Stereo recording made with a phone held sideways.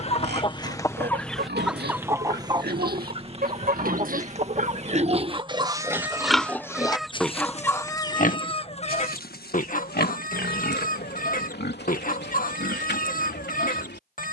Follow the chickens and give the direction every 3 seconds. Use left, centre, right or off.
centre, right, centre, left, left.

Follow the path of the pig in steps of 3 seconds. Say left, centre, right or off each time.
right, right, left, left, left.